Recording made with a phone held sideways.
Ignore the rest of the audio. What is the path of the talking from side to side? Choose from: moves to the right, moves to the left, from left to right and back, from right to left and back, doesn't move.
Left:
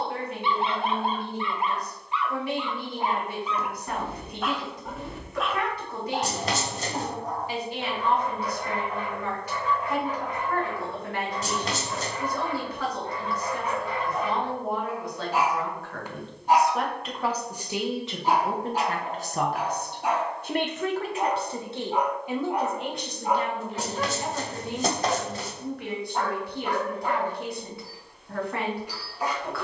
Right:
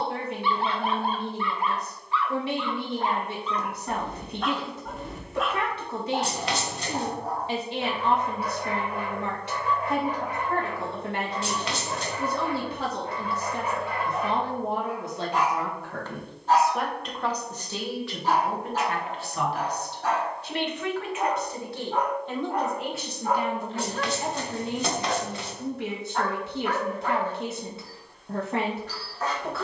from right to left and back.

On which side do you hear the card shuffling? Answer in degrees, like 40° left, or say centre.
40° left.